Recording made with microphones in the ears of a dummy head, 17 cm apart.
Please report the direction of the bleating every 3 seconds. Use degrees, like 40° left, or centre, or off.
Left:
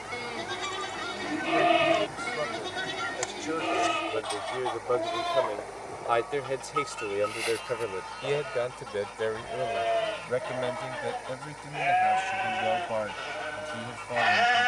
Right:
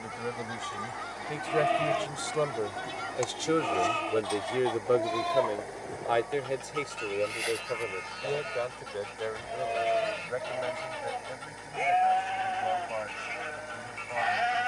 60° left, 10° left, 10° right, 10° left, 50° left.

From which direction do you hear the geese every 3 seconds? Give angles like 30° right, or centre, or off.
30° left, centre, 30° right, 30° right, 30° right.